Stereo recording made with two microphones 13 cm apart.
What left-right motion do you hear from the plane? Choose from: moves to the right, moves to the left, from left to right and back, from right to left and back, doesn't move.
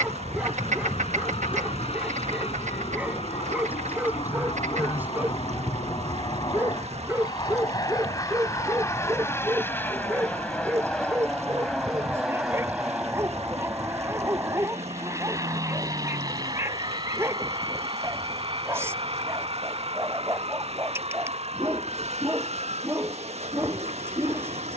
moves to the right.